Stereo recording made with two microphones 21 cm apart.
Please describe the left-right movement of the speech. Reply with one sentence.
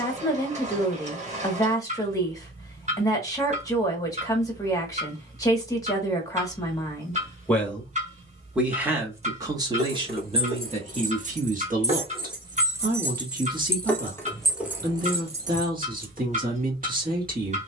In this clip you hear the speech go from the left side to the right.